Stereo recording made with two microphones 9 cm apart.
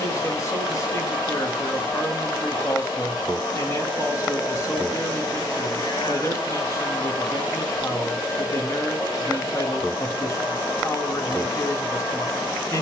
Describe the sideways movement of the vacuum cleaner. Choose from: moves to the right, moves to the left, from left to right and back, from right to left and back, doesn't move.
doesn't move.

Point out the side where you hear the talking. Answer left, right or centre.
left.